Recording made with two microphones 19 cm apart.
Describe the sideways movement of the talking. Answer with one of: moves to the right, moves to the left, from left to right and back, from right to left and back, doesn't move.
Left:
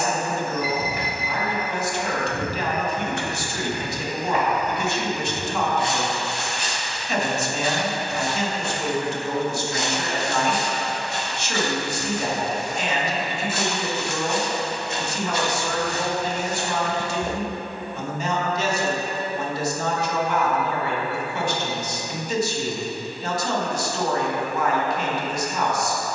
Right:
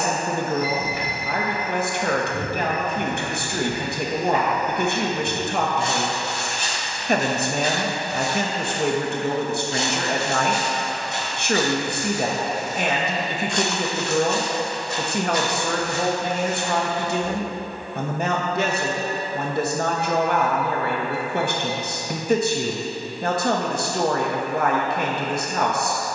doesn't move.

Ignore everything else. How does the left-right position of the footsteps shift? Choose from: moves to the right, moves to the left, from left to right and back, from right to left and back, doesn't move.
from left to right and back.